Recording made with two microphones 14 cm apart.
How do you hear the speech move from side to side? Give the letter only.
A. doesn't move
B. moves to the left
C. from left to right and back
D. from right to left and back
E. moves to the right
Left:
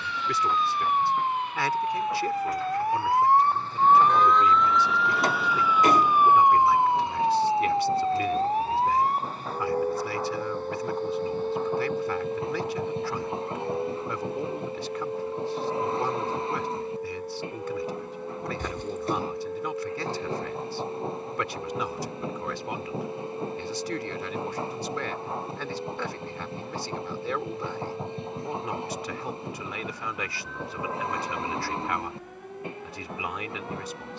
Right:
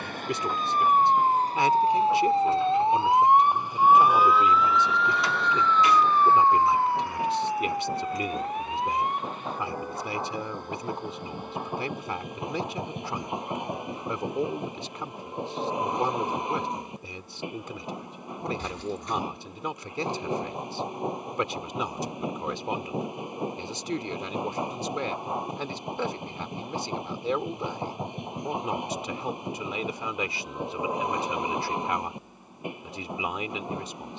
A.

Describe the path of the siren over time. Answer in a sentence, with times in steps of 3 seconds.
You can hear the siren on the right from 0 s, in the centre from 3 s and on the left from 6 s.